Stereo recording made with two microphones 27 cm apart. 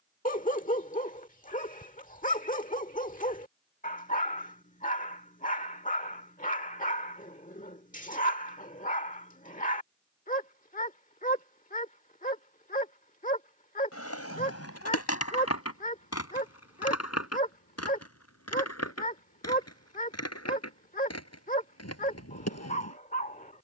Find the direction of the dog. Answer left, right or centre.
left.